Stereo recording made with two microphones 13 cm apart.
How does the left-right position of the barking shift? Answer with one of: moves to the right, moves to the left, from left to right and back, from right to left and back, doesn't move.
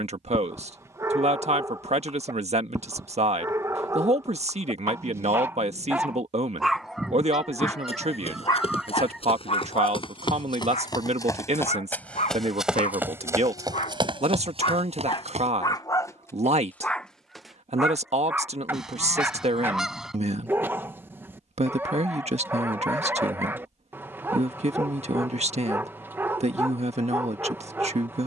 from right to left and back.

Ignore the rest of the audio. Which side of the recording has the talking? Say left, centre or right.
right.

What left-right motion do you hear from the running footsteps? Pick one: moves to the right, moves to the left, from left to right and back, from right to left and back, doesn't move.
moves to the right.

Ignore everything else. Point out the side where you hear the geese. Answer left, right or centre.
centre.